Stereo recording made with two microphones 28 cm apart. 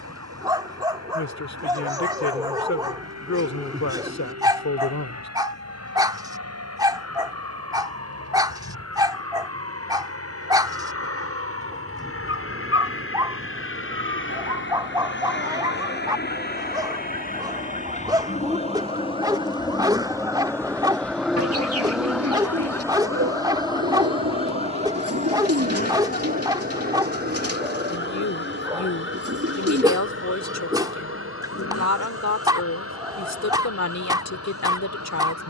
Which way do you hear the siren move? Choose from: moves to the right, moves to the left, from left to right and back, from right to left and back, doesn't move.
moves to the left.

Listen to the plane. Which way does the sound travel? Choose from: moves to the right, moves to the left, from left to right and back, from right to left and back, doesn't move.
moves to the right.